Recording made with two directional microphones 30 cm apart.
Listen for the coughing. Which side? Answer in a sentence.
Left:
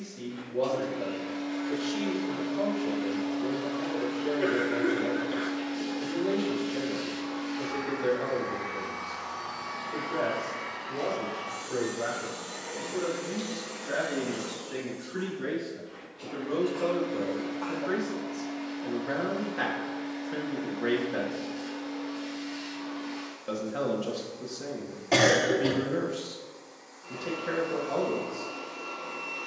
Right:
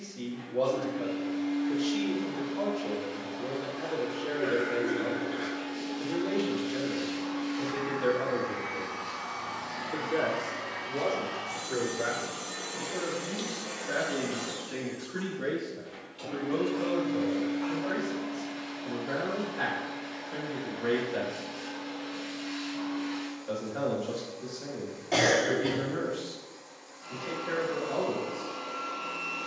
In this clip you hear the coughing on the left.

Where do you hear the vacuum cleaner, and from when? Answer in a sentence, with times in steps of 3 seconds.
In this clip you hear the vacuum cleaner on the left from 0 s, in the centre from 6 s and on the right from 9 s.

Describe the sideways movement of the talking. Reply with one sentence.
In this clip you hear the talking move to the left.